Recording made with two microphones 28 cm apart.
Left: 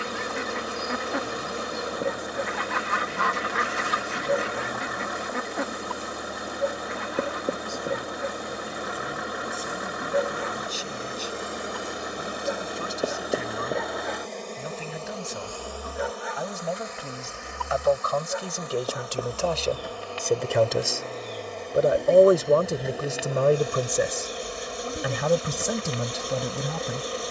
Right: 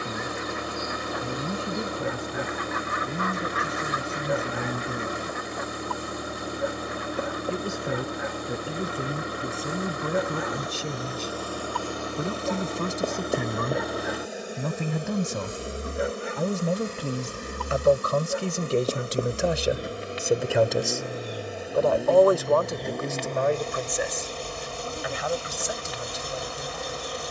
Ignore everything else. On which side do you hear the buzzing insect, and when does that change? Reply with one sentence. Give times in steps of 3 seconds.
In this clip you hear the buzzing insect on the left from 0 s, in the centre from 12 s, on the right from 15 s, in the centre from 21 s and on the left from 24 s.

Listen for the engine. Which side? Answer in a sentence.
In this clip you hear the engine on the right.